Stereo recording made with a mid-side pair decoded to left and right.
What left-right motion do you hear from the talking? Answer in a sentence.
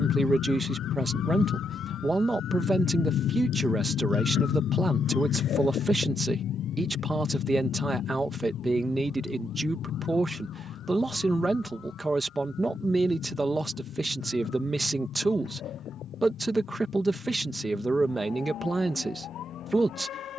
You can hear the talking stay put.